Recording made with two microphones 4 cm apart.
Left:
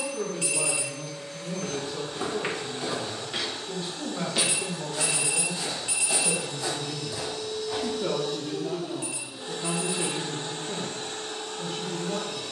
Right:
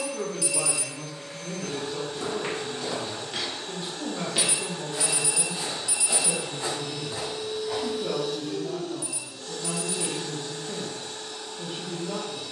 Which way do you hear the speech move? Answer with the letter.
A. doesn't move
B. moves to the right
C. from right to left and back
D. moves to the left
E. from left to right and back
C.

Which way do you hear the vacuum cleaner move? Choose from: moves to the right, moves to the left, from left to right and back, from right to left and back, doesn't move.
moves to the left.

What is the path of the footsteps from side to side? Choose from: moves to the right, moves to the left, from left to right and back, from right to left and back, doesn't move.
moves to the right.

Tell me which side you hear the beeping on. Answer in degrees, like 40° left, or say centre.
50° left.